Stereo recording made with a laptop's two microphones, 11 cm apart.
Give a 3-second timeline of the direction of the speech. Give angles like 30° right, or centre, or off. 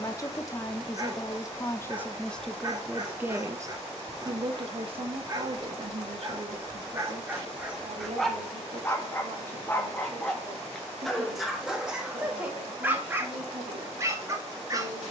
20° left, 40° right, 70° right, 80° right, 80° right.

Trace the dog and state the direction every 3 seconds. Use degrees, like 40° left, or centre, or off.
30° right, 30° right, 10° right, 10° left, 20° right.